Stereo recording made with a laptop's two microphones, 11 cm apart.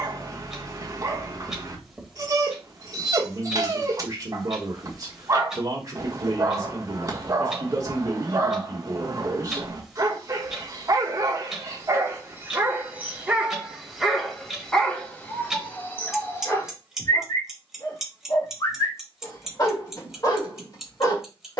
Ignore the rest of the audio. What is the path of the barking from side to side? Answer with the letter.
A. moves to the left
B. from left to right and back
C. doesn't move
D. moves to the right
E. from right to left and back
A.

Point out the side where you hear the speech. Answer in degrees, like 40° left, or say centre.
30° right.